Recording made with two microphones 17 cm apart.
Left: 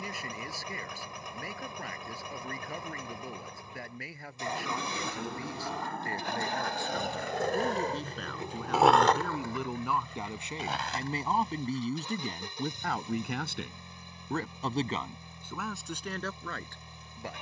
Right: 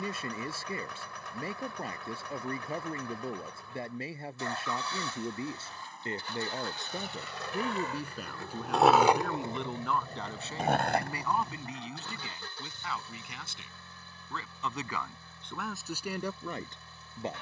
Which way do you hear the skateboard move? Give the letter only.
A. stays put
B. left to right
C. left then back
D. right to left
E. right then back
B.